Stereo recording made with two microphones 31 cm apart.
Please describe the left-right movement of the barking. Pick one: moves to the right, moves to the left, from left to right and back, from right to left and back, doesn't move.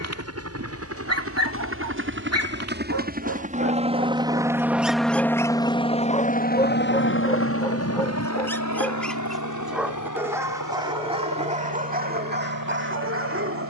from right to left and back.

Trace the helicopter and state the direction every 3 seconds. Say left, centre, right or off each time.
right, centre, left, left, left.